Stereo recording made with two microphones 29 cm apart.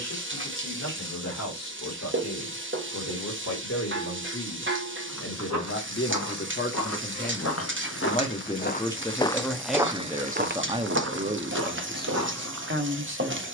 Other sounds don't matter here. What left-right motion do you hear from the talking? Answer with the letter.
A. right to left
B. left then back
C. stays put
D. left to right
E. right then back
D.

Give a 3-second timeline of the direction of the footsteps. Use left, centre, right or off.
off, left, left, right, right.